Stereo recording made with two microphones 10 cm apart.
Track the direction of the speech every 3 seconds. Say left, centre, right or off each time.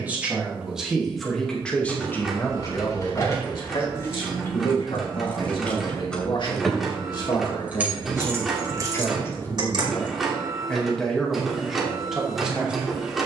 centre, left, left, centre, centre.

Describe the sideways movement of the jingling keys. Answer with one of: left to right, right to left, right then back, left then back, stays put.
left to right.